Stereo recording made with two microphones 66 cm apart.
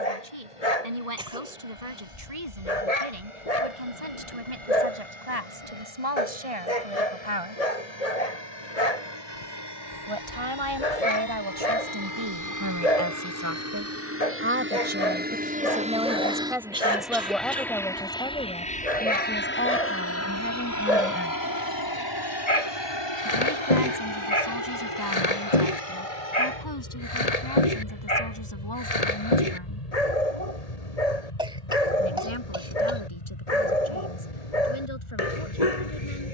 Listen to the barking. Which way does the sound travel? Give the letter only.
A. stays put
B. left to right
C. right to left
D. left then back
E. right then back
A.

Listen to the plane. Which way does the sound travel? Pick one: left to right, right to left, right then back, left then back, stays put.
right to left.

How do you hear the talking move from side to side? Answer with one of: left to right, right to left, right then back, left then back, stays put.
right to left.